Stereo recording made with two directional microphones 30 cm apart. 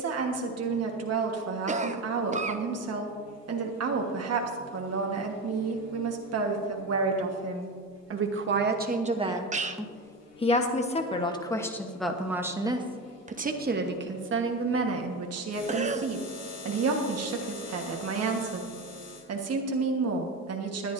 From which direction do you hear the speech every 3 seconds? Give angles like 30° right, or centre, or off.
60° right, 60° right, 50° right, 10° left, 30° right, 50° right, 60° right.